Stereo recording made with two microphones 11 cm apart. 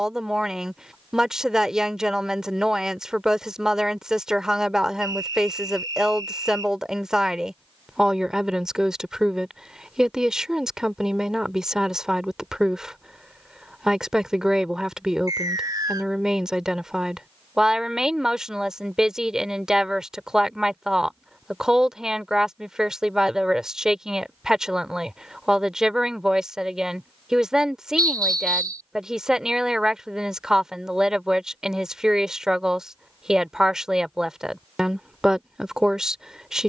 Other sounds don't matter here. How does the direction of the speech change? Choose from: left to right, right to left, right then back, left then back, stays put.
stays put.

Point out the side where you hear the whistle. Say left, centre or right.
right.